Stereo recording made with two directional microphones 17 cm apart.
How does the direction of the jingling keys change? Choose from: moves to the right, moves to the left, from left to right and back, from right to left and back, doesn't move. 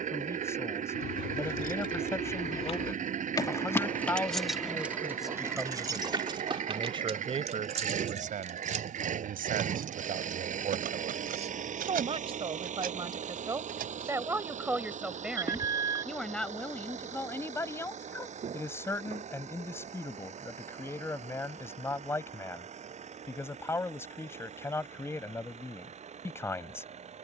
moves to the right.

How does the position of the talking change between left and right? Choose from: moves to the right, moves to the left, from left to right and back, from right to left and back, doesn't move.
from left to right and back.